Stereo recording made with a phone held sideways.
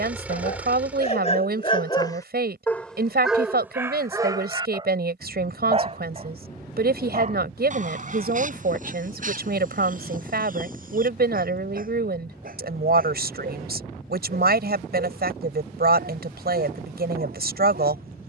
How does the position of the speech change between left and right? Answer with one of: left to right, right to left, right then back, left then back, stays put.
stays put.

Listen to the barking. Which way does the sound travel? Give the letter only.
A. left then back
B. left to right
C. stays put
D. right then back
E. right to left
B.